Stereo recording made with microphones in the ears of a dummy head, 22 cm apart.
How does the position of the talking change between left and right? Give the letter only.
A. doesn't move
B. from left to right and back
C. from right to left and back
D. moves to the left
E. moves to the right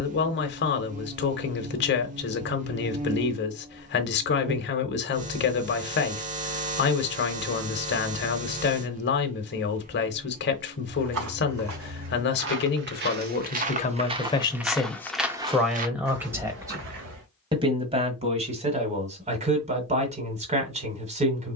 E.